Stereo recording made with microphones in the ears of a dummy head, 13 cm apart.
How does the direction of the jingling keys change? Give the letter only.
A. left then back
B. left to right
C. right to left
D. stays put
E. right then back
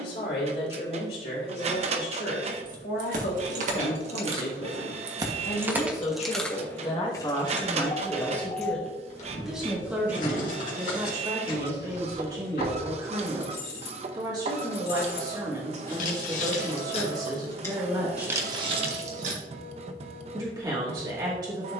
A.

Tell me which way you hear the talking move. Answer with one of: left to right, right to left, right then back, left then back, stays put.
left to right.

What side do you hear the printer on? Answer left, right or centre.
right.